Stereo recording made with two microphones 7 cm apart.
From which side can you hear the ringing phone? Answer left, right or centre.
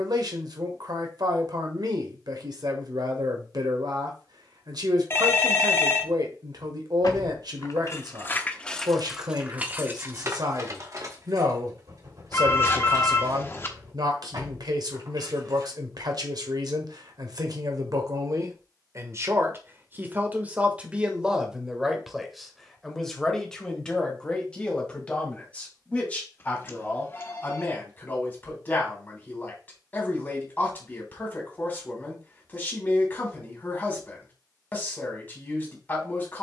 left.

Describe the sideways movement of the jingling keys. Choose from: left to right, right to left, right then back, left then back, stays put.
left to right.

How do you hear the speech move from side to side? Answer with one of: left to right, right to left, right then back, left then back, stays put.
right to left.